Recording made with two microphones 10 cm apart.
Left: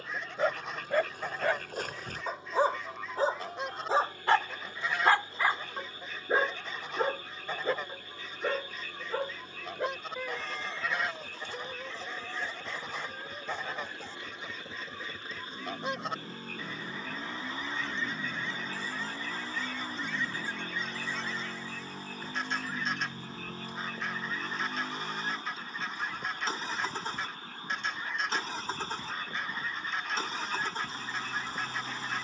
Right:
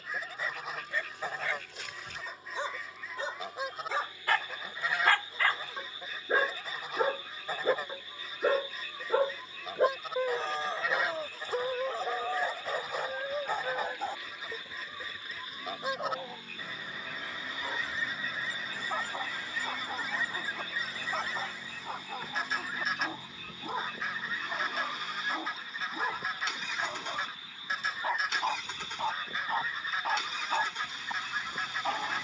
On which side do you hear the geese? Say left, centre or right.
centre.